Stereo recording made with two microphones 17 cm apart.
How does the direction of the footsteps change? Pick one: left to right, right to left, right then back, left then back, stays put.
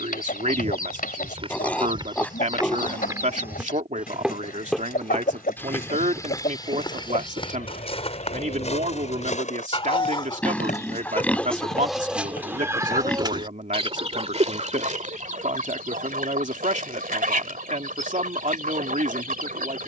right to left.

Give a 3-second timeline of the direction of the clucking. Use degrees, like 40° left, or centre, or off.
60° left, 60° left, 50° left, 20° left, 30° right, 50° right, 50° right.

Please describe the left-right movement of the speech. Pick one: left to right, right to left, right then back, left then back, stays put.
stays put.